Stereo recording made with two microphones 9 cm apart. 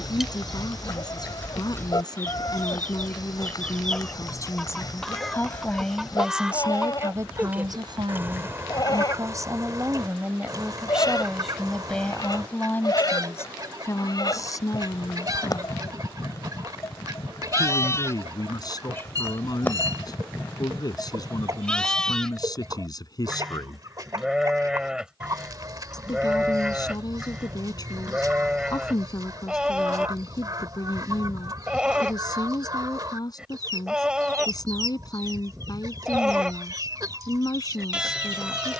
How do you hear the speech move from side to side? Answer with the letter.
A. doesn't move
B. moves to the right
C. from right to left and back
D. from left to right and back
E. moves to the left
D.